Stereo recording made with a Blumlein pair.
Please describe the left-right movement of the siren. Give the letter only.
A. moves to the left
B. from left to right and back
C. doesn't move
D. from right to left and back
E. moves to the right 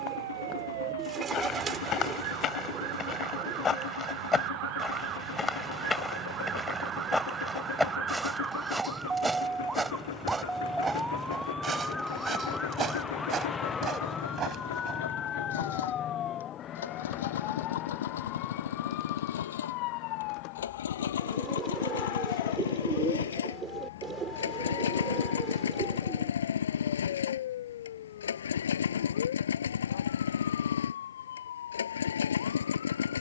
A.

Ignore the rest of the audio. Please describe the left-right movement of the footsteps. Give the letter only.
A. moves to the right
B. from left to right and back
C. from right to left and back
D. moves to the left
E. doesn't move
A.